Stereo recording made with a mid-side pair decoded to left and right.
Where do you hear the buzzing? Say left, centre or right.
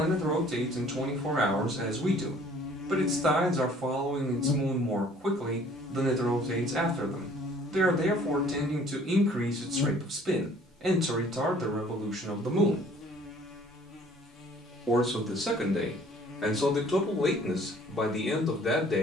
left.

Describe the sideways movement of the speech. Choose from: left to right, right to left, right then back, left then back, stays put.
right to left.